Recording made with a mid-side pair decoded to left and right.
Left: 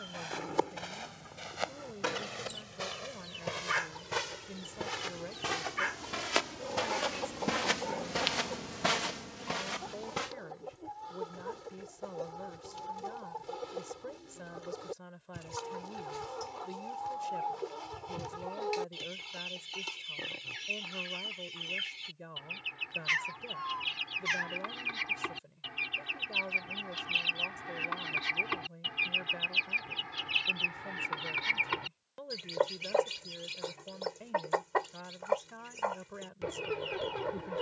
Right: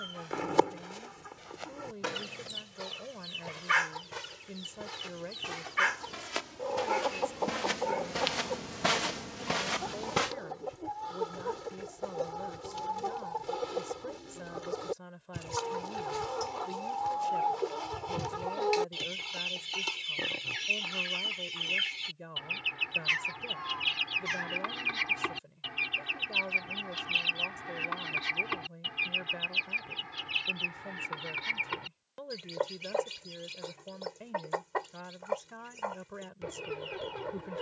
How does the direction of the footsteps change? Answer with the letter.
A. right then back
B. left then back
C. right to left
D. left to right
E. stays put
D.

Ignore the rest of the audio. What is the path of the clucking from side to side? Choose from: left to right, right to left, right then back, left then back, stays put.
right to left.